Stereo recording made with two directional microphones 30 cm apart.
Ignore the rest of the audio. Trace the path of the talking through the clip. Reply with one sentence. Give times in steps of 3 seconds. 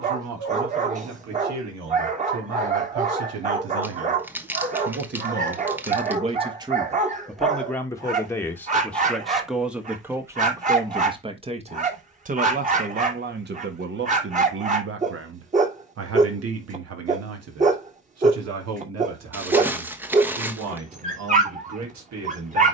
In this clip you hear the talking on the right from 0 s, in the centre from 6 s and on the right from 12 s.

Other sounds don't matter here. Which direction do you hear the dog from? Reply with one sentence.
In this clip you hear the dog on the right.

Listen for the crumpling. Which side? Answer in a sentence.
You can hear the crumpling in the centre.